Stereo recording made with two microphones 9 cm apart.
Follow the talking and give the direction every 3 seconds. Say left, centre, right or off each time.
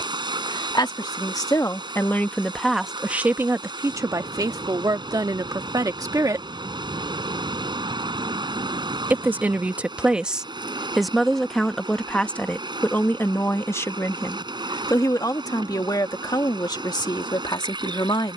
left, right, right, centre, left, left.